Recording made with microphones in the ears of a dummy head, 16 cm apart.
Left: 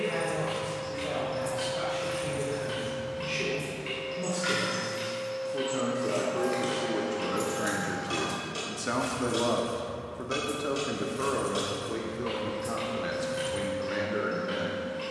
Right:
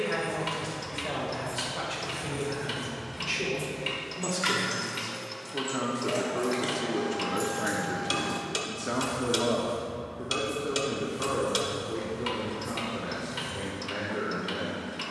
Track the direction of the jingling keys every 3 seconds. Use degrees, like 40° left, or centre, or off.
30° left, 30° right, centre, 30° left, 50° left.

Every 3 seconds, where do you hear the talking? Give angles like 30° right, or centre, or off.
50° right, 40° right, 10° right, 50° left, 70° left.